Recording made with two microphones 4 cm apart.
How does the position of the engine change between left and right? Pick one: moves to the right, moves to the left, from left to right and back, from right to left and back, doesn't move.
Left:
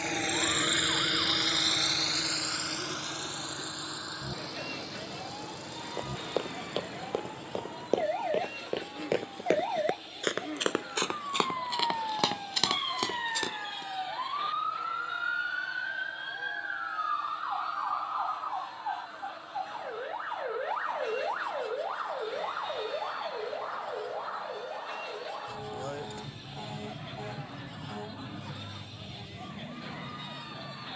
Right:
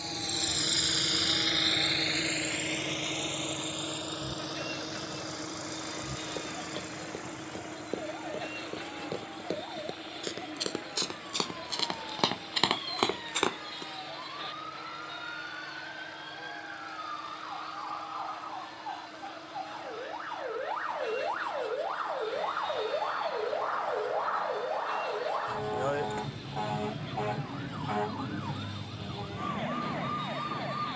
moves to the right.